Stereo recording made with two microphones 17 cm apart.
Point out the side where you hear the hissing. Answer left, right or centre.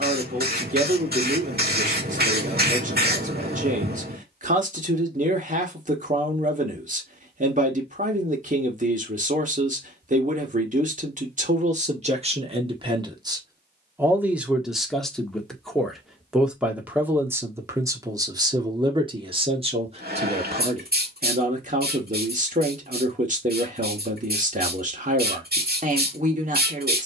right.